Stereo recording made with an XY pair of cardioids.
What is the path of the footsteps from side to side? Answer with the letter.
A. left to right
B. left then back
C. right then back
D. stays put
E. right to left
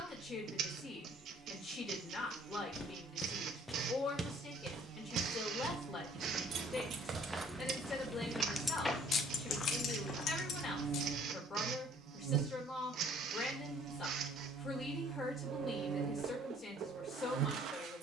C.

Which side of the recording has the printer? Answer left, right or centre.
right.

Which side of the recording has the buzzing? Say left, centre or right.
right.